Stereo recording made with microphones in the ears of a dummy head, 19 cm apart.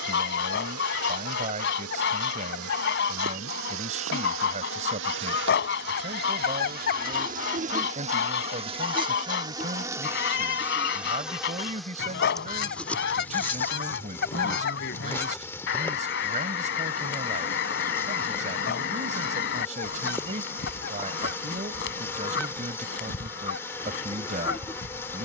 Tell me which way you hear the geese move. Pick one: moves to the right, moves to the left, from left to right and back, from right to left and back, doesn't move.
doesn't move.